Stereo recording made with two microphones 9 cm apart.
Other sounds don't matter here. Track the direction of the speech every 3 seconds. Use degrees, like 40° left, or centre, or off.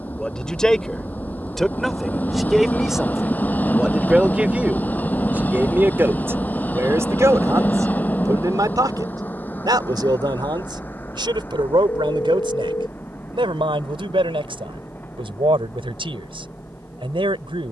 centre, 10° right, 40° right, 60° right, 70° right, 80° right.